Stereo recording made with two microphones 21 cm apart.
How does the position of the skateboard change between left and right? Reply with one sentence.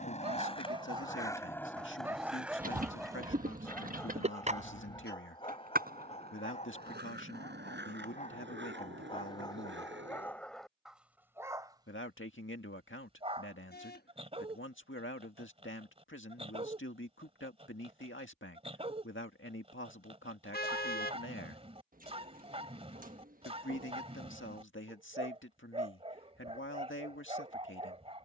You can hear the skateboard move from left to right.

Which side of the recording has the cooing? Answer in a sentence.
In this clip you hear the cooing on the right.